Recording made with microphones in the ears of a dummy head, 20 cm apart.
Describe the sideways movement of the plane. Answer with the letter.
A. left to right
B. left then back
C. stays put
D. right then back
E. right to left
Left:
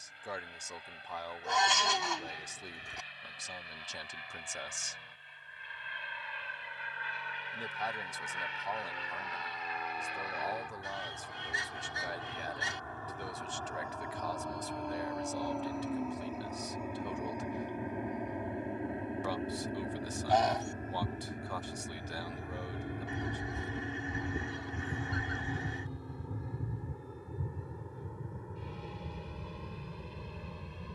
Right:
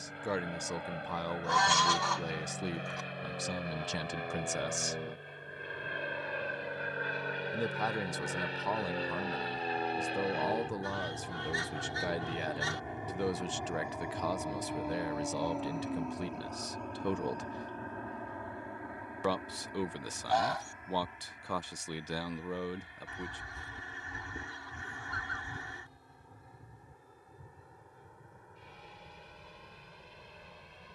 E.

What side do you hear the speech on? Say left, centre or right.
right.